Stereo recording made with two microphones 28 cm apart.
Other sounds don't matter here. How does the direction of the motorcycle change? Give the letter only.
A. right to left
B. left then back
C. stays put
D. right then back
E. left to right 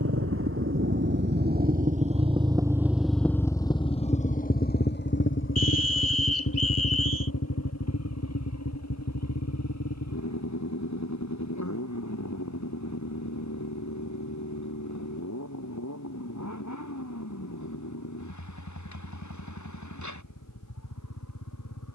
A.